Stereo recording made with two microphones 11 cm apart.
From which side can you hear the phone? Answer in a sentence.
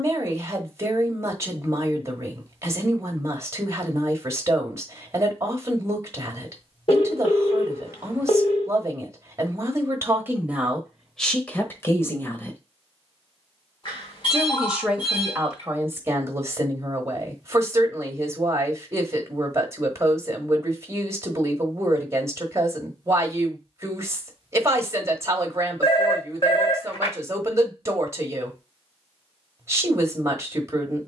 In this clip you hear the phone on the left.